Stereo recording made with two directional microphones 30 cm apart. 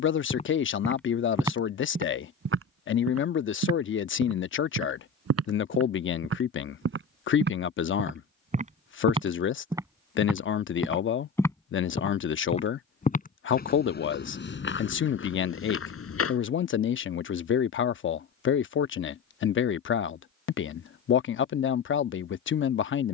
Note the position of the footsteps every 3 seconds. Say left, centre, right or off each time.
centre, right, right, centre, left, left, off, off.